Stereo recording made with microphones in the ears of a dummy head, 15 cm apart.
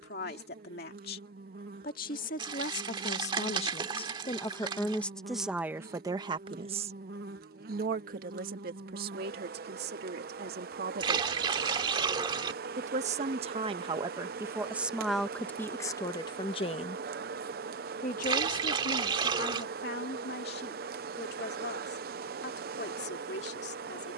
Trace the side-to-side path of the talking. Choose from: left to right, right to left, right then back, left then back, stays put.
right then back.